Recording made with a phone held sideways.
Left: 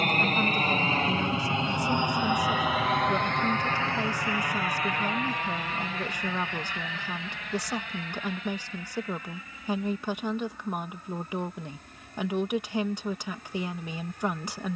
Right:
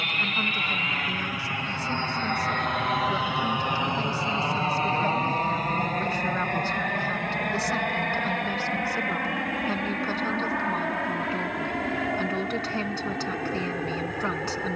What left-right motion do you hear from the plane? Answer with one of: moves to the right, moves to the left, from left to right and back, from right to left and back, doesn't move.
moves to the right.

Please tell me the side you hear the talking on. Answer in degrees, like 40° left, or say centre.
10° left.